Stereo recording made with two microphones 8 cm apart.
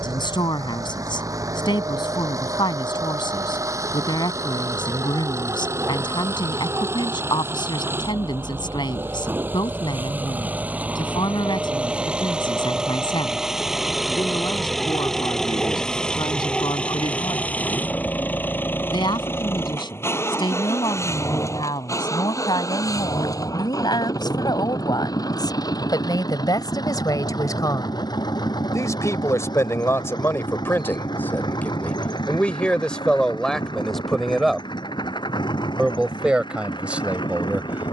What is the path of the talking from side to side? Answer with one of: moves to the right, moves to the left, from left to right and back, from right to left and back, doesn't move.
moves to the right.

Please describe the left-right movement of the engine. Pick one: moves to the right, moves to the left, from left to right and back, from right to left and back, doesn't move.
moves to the left.